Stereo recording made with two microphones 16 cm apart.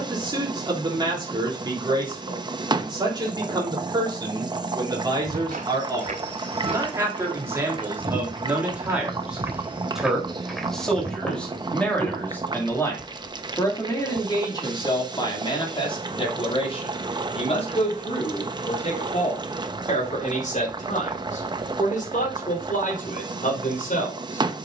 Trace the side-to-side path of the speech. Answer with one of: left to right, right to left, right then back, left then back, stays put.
right to left.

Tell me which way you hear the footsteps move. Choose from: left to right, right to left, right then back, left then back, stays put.
right to left.